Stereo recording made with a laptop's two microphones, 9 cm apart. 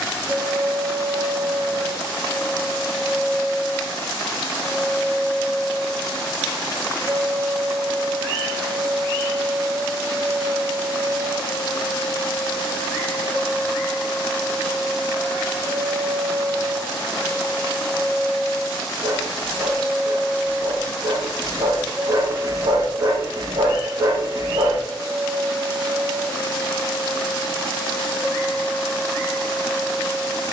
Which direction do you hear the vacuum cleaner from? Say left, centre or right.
centre.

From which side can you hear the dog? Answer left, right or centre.
right.